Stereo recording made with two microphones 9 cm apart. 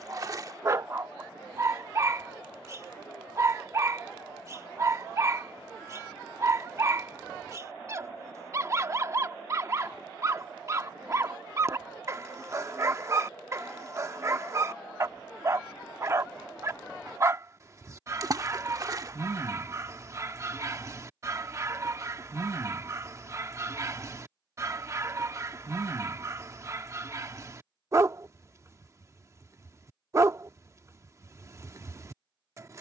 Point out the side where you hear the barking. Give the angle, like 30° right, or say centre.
40° right.